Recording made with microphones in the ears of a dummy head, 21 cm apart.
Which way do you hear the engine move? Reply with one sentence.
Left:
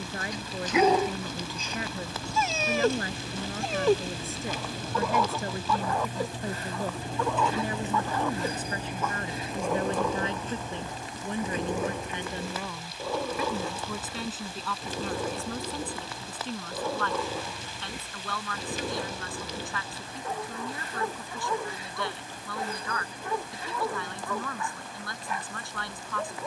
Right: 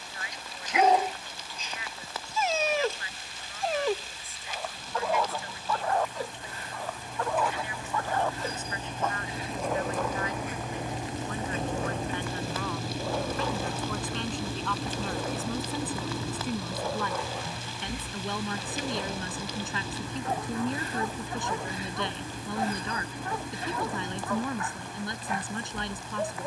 You can hear the engine move to the right.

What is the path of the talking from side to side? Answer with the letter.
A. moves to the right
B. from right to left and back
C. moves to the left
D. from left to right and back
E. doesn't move
A.